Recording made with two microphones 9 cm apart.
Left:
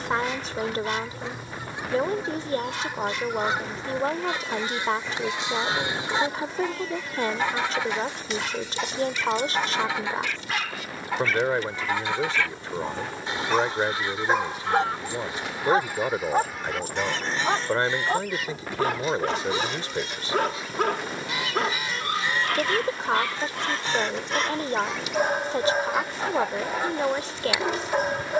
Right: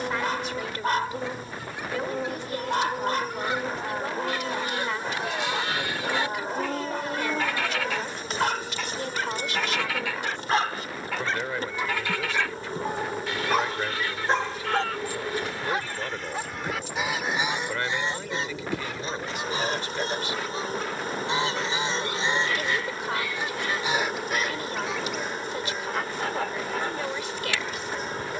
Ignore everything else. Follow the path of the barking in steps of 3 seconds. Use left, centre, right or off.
right, right, right, right, centre, left, left, left, left, left.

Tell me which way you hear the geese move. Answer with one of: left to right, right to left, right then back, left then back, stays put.
right then back.